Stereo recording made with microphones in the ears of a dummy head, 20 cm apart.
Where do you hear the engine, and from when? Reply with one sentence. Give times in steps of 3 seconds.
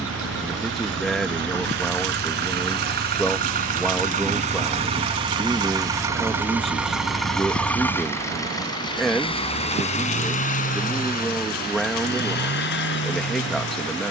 In this clip you hear the engine on the right from 0 s, in the centre from 6 s and on the left from 9 s.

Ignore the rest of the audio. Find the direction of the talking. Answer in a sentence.
In this clip you hear the talking in the centre.